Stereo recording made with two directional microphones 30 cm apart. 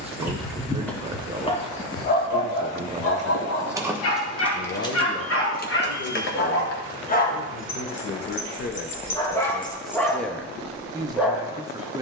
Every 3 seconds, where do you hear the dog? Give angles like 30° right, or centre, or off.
20° left, 50° left, 30° left, centre.